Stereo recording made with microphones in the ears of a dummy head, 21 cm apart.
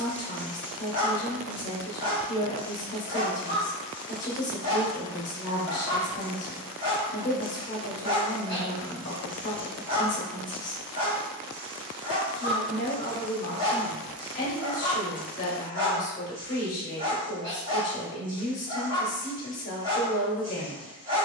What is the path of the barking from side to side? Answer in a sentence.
In this clip you hear the barking stay put.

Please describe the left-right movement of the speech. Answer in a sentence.
In this clip you hear the speech stay in one place.